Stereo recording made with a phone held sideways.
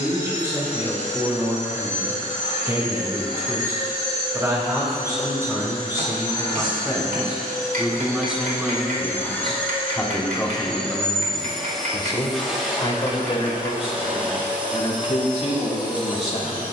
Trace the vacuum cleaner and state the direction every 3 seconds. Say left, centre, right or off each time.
left, left, left, centre, centre, centre.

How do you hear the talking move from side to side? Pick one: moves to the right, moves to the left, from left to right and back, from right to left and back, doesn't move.
moves to the left.